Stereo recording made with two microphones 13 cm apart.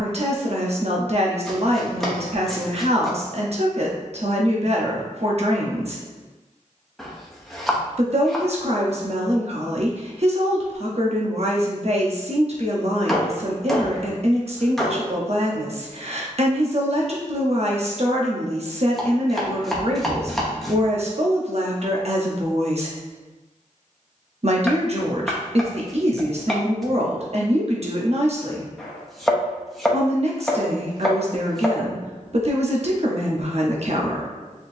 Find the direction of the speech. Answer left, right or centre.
right.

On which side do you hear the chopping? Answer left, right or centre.
centre.